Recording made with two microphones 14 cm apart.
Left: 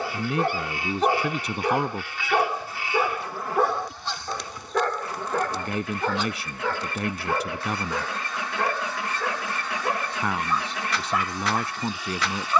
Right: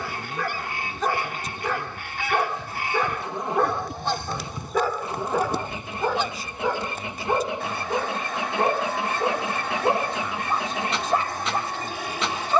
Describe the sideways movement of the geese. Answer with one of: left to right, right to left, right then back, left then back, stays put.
stays put.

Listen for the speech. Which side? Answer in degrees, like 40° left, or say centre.
70° left.